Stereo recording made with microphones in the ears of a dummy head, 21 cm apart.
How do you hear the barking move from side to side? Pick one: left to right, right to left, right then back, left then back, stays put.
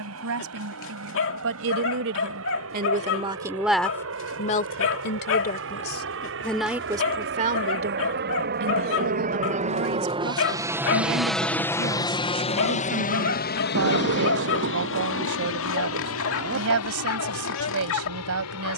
stays put.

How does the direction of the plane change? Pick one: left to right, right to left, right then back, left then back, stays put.
right to left.